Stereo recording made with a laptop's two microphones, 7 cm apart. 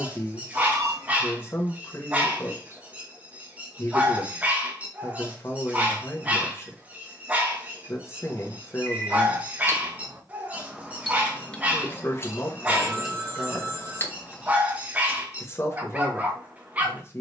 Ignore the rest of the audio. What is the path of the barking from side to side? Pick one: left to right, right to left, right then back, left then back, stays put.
stays put.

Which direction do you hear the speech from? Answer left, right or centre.
left.